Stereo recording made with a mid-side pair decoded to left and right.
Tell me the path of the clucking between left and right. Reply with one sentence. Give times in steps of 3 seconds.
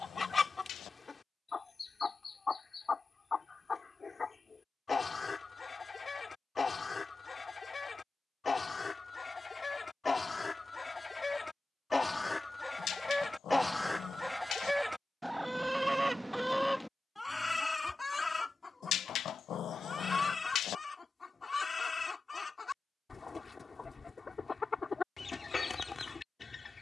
In this clip you hear the clucking on the left from 0 s, in the centre from 12 s and on the left from 18 s.